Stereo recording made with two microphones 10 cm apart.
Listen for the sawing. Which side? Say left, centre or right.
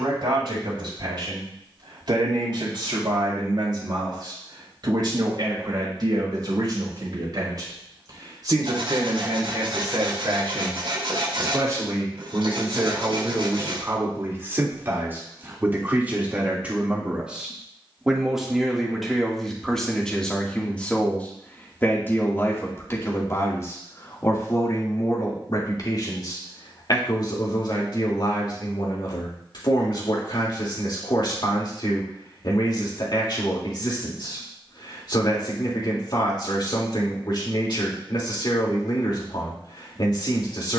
right.